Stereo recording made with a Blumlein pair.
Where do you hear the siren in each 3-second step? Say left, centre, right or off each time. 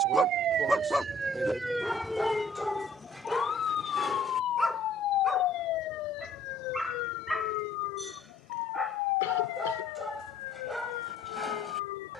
centre, left, left, left.